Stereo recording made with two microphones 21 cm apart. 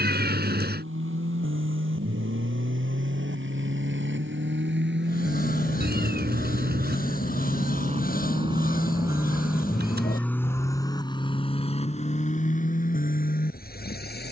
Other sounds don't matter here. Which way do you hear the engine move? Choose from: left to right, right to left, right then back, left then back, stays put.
right to left.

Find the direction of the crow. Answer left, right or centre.
left.